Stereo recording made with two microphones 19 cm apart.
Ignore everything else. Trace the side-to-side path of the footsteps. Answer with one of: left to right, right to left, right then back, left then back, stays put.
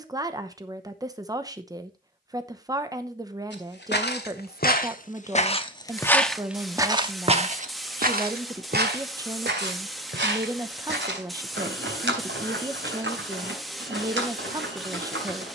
left to right.